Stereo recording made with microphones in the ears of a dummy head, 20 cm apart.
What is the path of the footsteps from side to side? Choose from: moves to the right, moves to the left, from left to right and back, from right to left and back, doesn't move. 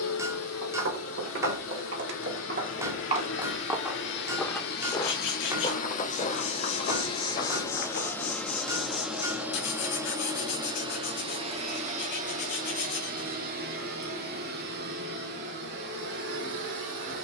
moves to the left.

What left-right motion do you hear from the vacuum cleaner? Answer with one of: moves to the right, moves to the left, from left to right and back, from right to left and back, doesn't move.
moves to the right.